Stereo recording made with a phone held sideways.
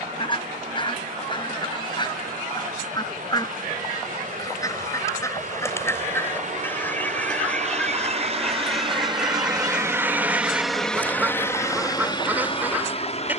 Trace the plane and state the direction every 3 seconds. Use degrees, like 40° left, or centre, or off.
80° right, 70° right, 50° right, centre, 40° left.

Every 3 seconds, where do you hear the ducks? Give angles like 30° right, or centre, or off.
30° left, 20° left, 10° left, 10° right, 10° right.